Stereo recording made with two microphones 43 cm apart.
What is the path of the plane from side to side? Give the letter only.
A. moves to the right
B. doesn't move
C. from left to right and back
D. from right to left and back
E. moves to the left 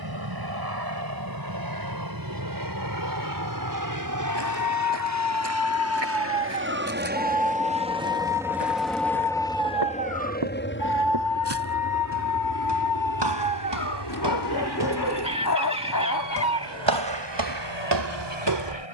E.